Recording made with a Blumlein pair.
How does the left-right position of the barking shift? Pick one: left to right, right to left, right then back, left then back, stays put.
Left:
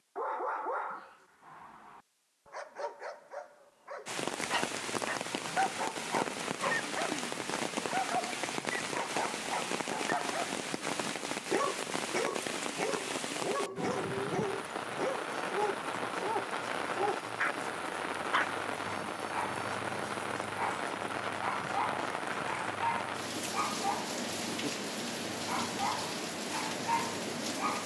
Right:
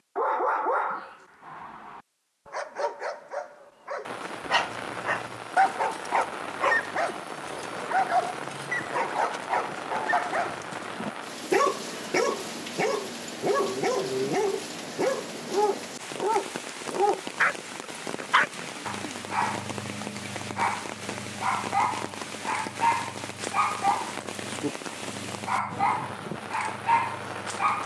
stays put.